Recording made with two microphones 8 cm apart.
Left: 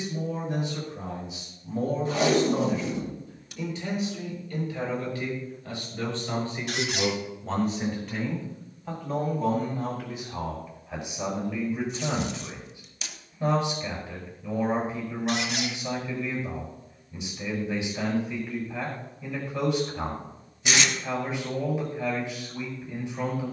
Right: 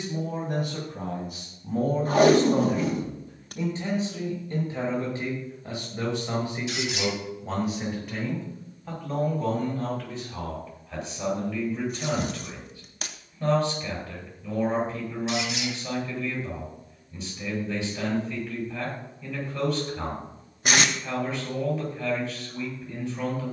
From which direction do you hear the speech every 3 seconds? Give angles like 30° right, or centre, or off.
50° right, 30° right, 10° right, 10° left, 10° left, 10° left, 10° left, 10° left.